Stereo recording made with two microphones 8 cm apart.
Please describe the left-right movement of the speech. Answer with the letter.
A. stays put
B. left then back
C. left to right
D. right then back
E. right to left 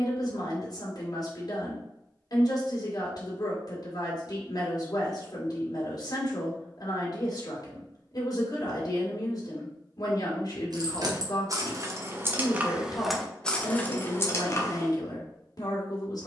A.